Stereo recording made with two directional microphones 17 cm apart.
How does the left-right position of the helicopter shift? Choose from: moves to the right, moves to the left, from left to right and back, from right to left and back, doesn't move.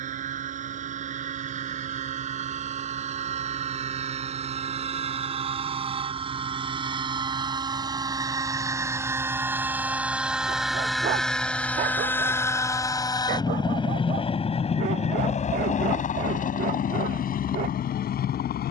moves to the left.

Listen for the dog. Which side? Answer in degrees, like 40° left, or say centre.
60° right.